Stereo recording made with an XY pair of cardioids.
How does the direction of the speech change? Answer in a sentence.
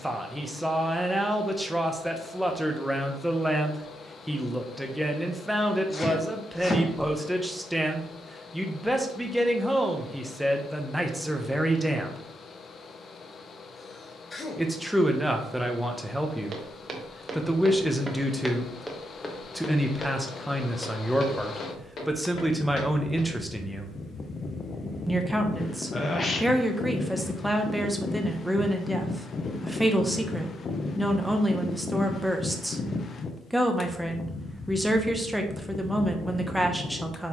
You can hear the speech stay put.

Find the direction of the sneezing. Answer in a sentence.
You can hear the sneezing on the left.